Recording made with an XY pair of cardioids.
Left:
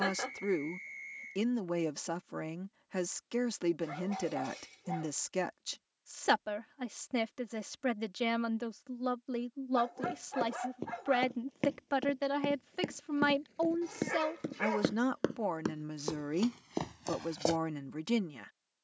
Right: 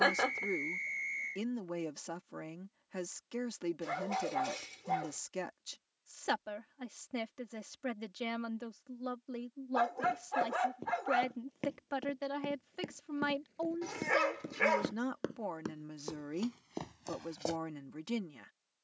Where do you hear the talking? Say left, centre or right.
left.